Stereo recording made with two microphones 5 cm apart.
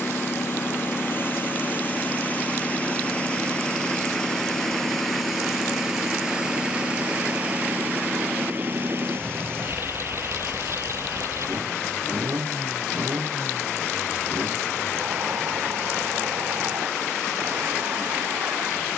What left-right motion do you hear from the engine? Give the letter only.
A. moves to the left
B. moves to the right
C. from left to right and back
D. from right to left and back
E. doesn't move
B.